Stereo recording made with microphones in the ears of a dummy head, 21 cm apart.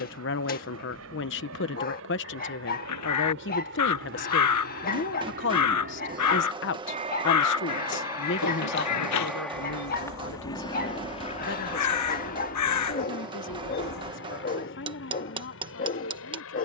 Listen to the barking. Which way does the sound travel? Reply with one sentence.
In this clip you hear the barking stay in one place.